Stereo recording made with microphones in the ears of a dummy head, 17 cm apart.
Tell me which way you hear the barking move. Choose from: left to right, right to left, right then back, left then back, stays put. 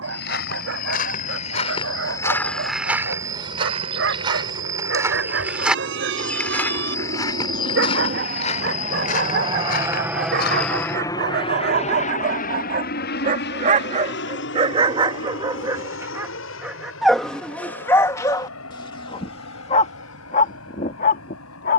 right to left.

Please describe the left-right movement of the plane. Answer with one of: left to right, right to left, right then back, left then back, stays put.
right to left.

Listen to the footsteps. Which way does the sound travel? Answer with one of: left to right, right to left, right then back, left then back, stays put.
right then back.